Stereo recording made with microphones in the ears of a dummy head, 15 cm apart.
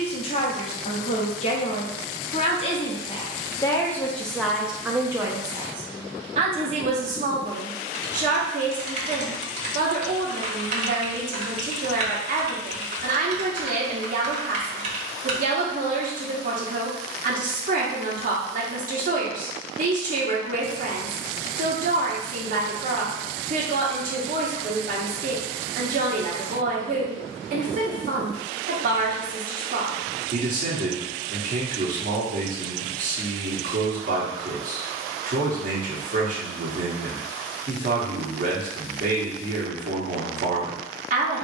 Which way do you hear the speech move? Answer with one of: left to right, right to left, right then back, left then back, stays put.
left to right.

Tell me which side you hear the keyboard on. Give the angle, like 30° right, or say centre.
40° right.